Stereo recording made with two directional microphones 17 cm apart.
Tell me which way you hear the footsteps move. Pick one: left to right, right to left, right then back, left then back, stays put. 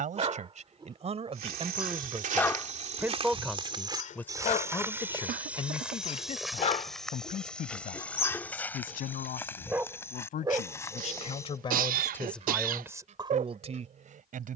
right to left.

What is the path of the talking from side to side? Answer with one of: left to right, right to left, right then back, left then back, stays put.
left then back.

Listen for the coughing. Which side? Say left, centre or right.
right.